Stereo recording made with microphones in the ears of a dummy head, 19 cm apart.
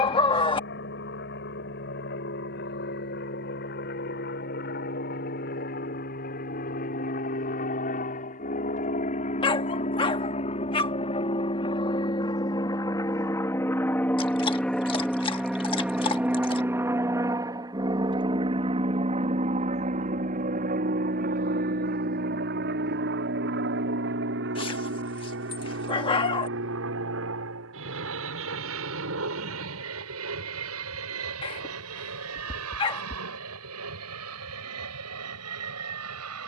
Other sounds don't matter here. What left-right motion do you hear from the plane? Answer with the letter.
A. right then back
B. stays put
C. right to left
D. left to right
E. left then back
D.